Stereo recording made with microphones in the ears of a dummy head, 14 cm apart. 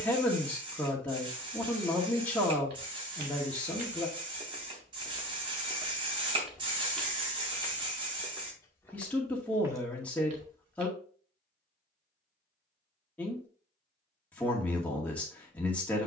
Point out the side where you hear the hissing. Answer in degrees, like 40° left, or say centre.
30° right.